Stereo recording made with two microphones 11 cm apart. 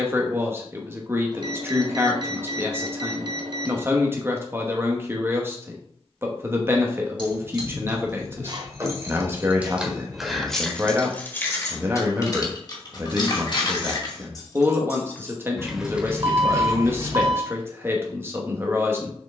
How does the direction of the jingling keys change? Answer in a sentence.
You can hear the jingling keys go left and come back.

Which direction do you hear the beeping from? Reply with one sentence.
In this clip you hear the beeping on the right.